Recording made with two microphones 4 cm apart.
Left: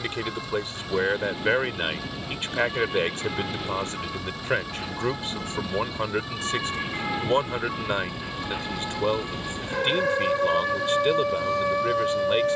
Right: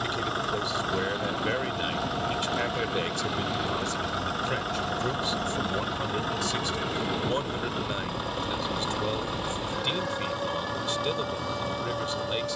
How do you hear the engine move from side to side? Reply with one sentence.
In this clip you hear the engine stay in one place.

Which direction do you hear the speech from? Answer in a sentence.
In this clip you hear the speech on the left.